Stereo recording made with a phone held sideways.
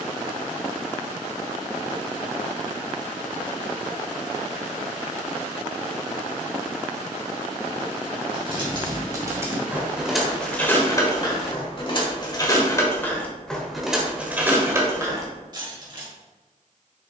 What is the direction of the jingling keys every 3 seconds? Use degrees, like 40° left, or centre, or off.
off, off, 30° right, 10° left, 10° left, 30° right.